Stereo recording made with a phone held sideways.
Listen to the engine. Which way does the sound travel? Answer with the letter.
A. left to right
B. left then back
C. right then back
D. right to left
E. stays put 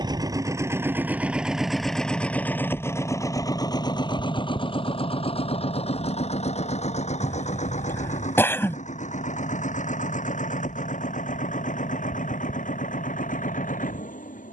D.